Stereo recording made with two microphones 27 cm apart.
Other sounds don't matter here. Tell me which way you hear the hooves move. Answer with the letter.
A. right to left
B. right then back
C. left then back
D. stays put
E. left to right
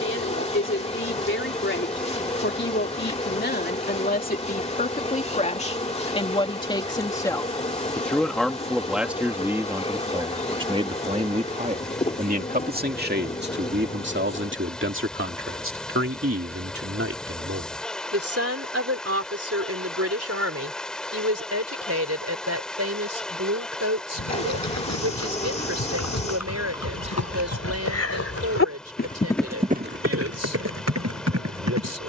E.